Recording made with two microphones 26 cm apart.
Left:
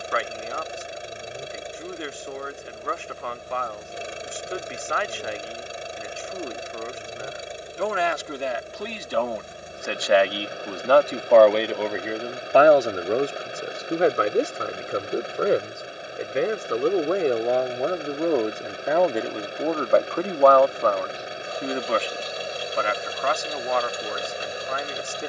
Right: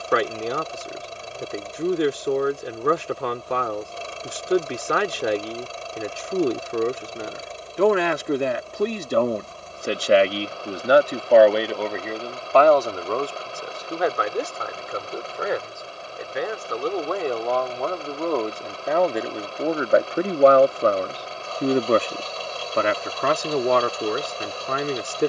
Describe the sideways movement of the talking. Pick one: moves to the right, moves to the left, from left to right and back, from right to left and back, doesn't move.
from right to left and back.